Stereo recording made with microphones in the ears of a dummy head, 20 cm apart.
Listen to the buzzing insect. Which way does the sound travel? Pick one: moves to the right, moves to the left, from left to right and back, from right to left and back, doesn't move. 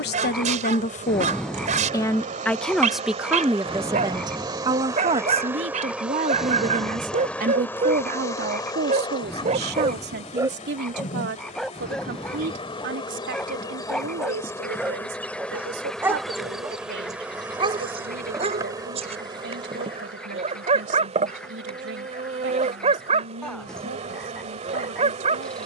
from right to left and back.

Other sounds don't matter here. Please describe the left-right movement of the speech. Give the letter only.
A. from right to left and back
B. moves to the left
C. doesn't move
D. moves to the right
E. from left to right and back
D.